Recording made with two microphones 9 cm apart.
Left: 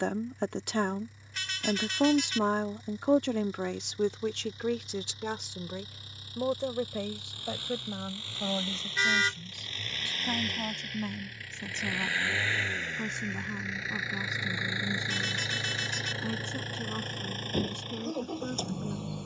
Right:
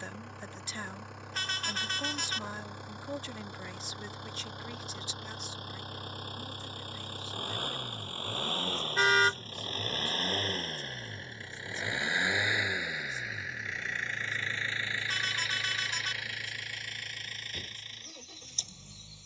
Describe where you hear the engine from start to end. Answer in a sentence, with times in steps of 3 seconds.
In this clip you hear the engine on the right from 0 s, in the centre from 12 s and on the left from 15 s.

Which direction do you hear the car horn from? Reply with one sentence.
In this clip you hear the car horn on the right.